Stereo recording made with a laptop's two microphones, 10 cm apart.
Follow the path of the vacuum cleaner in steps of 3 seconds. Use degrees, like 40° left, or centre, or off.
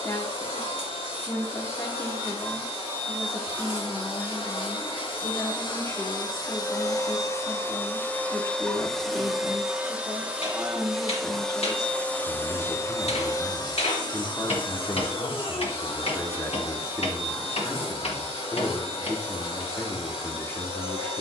70° left, 60° left, 30° left, centre, 40° left, 70° left, 70° left.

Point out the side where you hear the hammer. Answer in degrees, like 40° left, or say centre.
90° left.